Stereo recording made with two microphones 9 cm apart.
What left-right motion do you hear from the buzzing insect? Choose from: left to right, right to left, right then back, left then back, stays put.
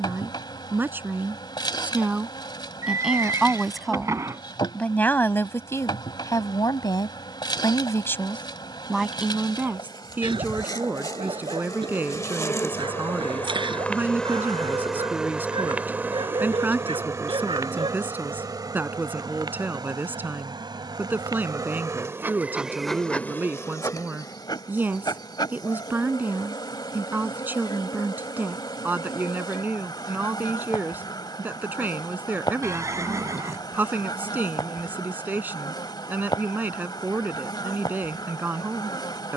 right then back.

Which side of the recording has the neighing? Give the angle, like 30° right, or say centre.
40° right.